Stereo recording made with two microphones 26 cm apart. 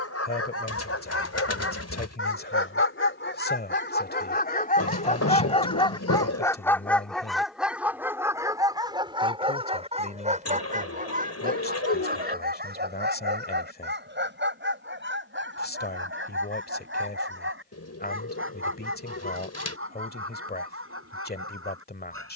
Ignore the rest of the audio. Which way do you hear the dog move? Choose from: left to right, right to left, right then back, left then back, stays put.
left to right.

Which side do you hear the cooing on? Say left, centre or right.
left.